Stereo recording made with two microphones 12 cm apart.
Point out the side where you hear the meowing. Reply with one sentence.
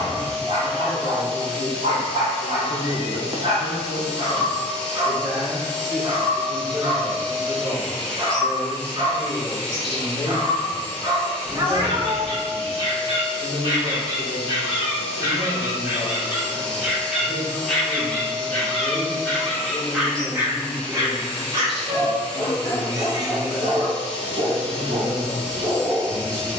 You can hear the meowing on the right.